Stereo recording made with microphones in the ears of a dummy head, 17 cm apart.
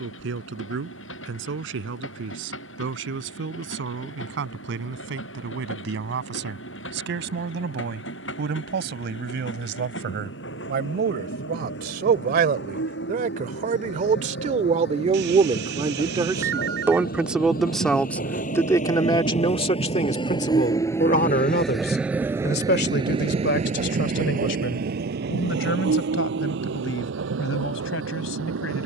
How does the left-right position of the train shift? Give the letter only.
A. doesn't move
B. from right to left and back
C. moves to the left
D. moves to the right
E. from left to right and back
D.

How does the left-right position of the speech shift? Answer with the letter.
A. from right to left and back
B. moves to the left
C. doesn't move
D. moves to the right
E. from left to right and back
B.